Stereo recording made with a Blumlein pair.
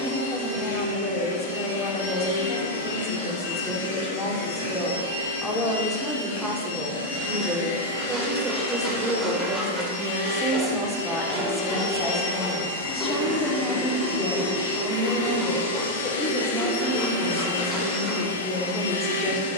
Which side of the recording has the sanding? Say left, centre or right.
centre.